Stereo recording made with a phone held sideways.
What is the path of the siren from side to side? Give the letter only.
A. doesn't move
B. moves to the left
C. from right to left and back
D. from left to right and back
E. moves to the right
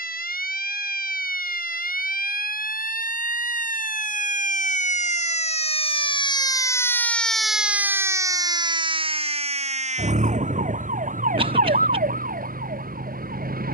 E.